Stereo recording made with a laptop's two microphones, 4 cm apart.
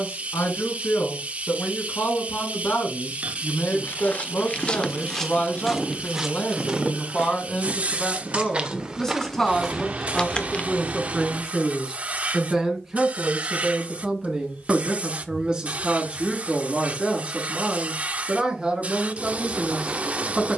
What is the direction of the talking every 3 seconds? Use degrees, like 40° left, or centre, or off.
60° left, 40° left, 20° left, centre, 10° right, 20° right, 20° right.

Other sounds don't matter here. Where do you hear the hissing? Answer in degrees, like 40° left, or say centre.
30° right.